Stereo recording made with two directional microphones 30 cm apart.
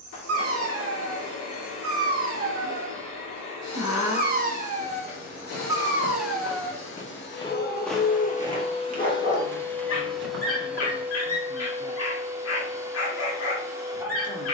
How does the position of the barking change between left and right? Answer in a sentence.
In this clip you hear the barking move to the left.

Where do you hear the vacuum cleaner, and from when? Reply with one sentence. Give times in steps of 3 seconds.
You can hear the vacuum cleaner on the left from 0 s and in the centre from 9 s.